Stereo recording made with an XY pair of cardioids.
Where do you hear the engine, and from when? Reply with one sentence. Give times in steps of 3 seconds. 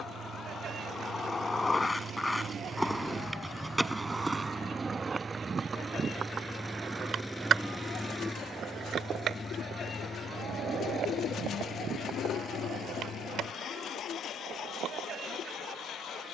In this clip you hear the engine on the right from 0 s, in the centre from 6 s and on the left from 9 s.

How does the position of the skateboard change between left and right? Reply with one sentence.
In this clip you hear the skateboard move to the right.